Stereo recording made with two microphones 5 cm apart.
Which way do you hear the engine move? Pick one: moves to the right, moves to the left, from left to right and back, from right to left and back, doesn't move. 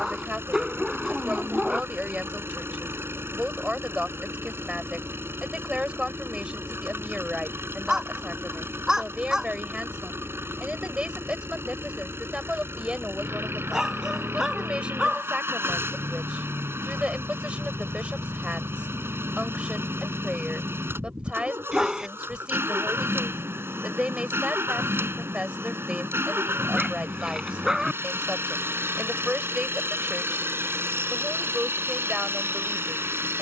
doesn't move.